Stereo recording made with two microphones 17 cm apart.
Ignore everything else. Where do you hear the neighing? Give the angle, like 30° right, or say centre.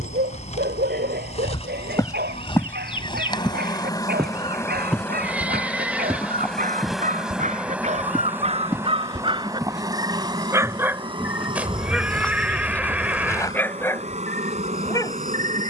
10° right.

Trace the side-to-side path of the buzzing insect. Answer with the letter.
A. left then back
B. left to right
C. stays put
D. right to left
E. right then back
B.